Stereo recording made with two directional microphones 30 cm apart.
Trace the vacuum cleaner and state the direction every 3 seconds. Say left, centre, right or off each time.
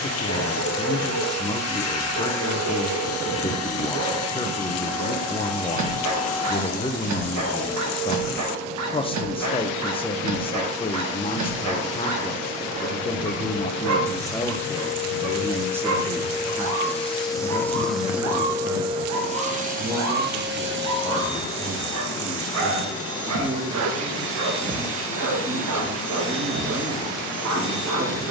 left, left, left, left, left, left, right, right, right, right.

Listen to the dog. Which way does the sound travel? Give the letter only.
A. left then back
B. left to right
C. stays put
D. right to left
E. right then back
C.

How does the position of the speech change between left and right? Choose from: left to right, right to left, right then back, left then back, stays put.
left to right.